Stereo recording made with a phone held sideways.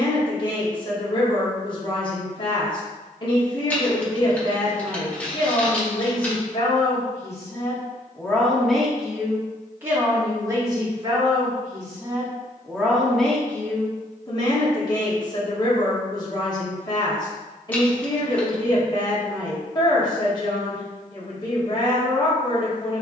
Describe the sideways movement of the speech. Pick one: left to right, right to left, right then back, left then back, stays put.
right then back.